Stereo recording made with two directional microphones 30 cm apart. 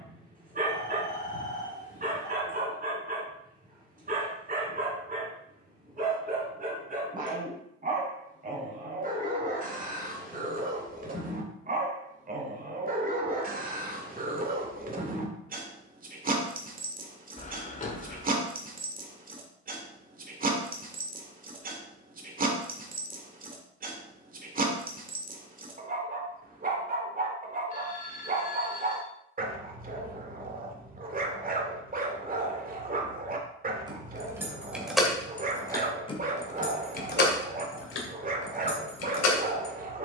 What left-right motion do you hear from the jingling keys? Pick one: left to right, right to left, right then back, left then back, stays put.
right to left.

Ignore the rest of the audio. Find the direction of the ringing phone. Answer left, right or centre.
left.